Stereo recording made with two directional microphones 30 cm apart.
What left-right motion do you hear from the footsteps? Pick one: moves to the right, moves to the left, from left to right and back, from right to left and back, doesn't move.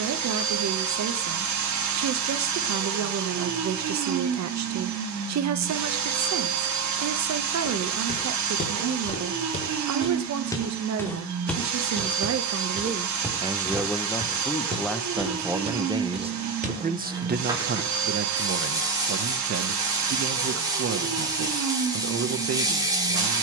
moves to the right.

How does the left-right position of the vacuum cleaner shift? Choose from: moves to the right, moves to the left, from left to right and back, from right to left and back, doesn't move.
doesn't move.